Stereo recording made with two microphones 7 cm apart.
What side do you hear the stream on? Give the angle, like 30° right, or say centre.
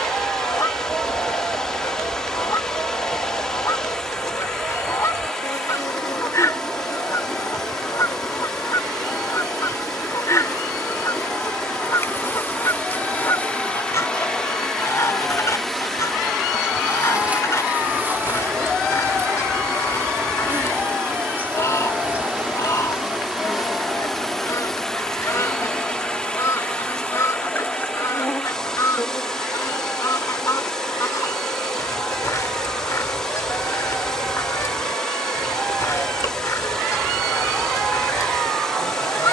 10° left.